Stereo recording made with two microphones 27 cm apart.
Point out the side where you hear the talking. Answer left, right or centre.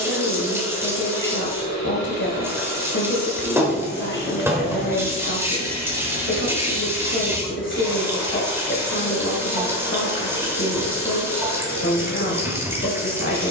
left.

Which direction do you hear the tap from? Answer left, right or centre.
centre.